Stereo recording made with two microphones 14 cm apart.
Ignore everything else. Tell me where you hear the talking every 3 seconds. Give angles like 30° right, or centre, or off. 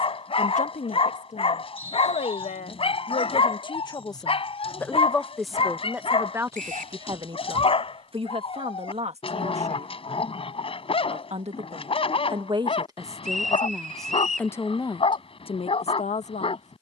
50° left, 20° left, 30° right, 50° right, 10° right, 50° left.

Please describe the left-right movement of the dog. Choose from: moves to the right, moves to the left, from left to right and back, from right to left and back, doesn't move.
doesn't move.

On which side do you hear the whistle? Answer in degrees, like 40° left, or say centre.
70° right.